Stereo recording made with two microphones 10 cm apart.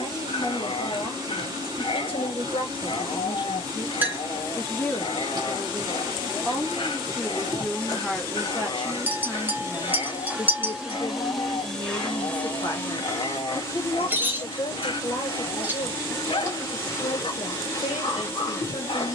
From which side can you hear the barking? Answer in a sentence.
In this clip you hear the barking on the left.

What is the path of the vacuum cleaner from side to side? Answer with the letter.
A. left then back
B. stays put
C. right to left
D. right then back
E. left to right
C.